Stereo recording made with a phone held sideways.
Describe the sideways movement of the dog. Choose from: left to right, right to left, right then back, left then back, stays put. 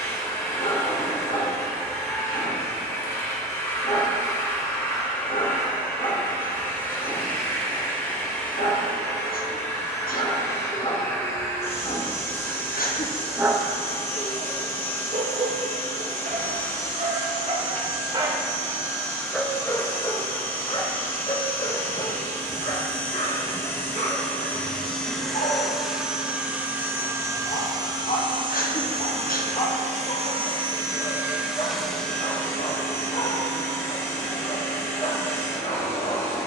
right then back.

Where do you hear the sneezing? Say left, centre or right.
left.